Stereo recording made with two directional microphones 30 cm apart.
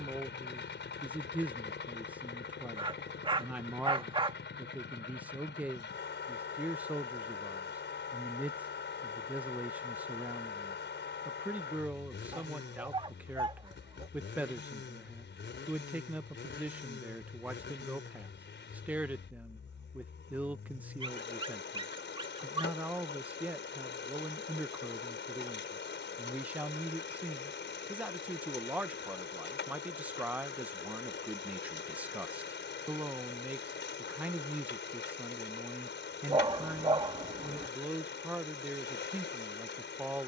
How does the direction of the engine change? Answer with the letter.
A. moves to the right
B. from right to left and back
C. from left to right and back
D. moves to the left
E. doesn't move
E.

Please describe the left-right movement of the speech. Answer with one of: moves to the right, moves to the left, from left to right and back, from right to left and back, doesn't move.
doesn't move.